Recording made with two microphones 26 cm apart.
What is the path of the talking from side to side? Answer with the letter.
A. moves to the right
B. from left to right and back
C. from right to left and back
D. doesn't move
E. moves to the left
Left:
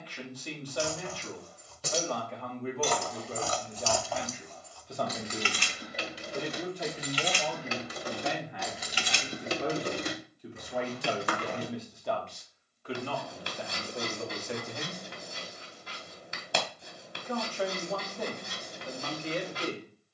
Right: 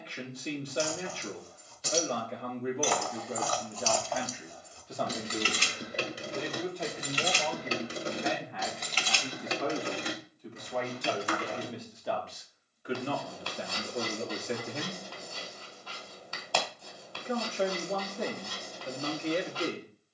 C.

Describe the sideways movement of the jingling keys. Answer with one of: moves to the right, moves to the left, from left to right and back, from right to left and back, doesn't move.
from left to right and back.